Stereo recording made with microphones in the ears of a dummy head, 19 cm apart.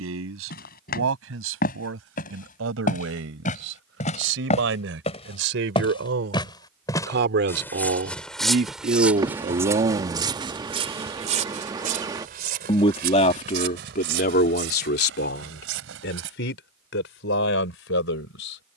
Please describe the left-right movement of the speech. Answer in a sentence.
You can hear the speech move to the left.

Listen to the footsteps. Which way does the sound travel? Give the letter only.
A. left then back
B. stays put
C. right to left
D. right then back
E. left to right
E.